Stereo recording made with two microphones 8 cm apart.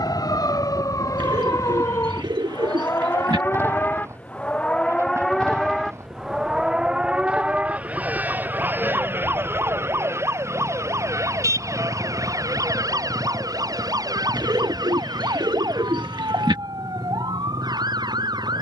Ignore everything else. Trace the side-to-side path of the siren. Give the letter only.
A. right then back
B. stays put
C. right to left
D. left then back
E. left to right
E.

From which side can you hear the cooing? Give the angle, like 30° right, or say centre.
60° right.